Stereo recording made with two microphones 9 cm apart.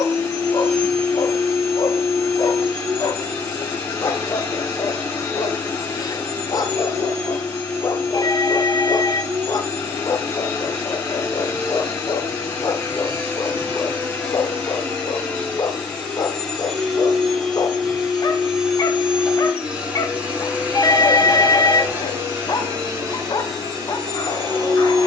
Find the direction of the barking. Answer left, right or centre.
left.